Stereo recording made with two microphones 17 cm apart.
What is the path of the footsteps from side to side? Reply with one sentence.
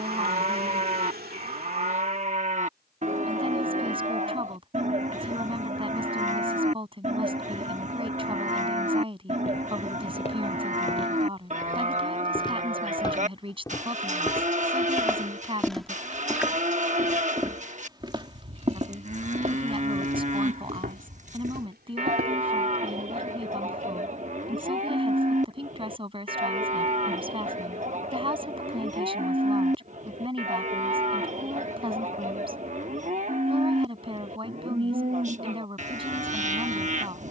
You can hear the footsteps travel towards the right.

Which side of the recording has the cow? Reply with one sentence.
You can hear the cow on the right.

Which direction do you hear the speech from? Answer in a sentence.
You can hear the speech on the right.